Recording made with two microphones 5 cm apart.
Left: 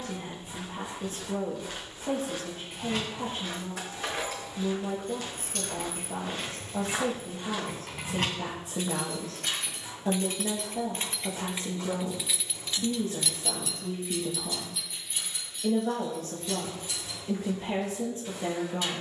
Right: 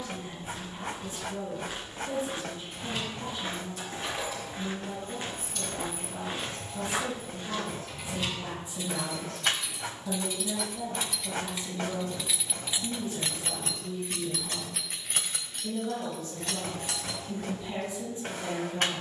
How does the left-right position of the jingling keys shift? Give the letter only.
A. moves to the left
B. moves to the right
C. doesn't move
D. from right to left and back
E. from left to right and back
B.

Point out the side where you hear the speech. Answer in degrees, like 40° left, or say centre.
70° left.